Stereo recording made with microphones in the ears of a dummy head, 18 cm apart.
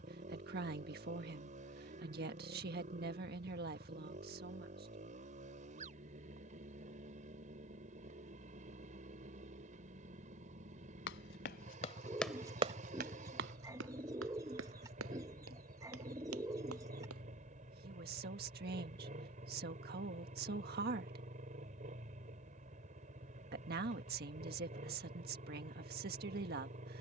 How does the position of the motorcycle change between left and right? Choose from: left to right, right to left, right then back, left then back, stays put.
stays put.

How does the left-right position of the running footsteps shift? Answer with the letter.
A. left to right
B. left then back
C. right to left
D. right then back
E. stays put
A.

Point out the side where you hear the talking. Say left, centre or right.
right.